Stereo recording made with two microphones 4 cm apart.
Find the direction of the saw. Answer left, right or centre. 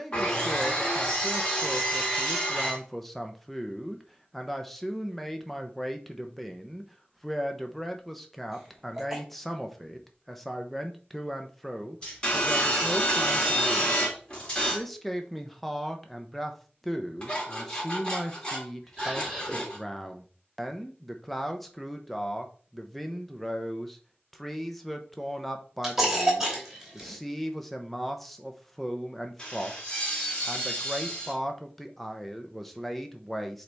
left.